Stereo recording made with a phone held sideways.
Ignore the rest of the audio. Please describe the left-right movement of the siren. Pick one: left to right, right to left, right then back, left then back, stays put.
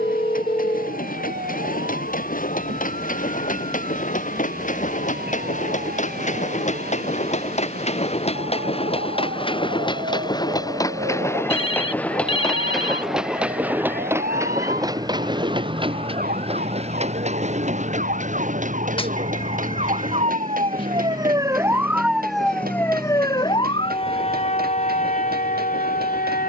right to left.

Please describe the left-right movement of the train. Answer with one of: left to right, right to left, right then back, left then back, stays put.
left to right.